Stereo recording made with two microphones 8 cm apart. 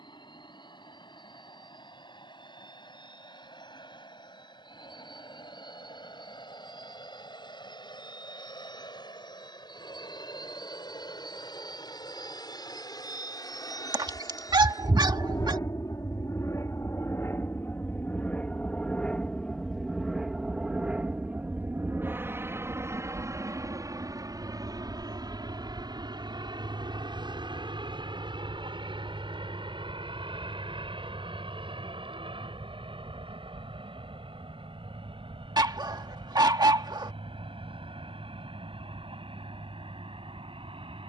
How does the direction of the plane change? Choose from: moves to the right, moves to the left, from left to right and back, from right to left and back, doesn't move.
moves to the right.